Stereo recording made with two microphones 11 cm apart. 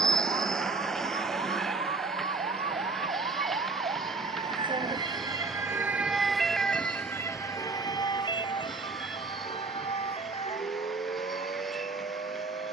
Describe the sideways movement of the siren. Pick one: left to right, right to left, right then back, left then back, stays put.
right to left.